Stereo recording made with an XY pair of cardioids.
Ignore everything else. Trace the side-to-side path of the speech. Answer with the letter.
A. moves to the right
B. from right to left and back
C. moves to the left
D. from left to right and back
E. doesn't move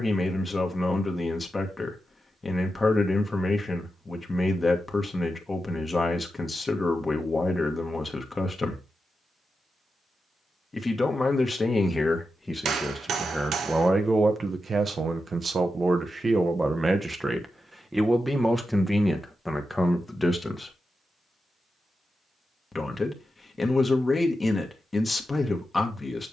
D.